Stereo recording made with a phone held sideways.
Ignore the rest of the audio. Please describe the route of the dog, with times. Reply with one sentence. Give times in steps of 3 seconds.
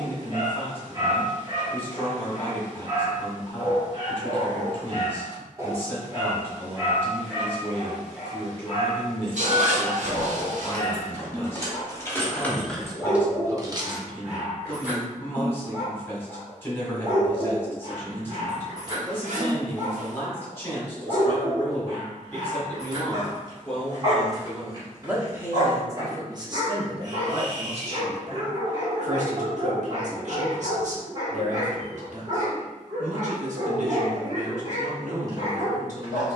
You can hear the dog on the right from 0 s, in the centre from 6 s and on the right from 15 s.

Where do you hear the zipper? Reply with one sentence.
In this clip you hear the zipper on the right.